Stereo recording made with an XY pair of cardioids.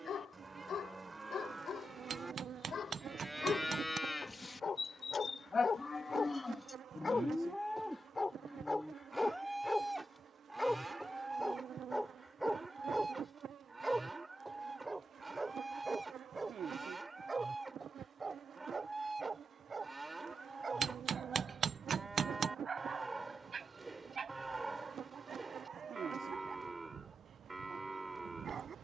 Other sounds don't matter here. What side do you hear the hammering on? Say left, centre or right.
right.